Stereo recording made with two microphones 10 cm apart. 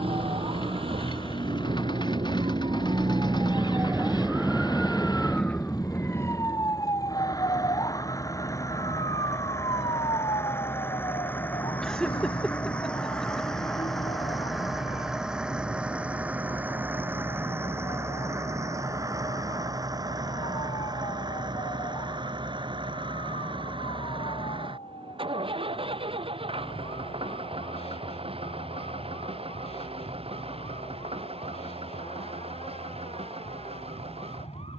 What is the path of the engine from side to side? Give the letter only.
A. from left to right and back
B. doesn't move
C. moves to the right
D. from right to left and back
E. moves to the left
C.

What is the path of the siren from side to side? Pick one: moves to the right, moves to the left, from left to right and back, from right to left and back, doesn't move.
moves to the left.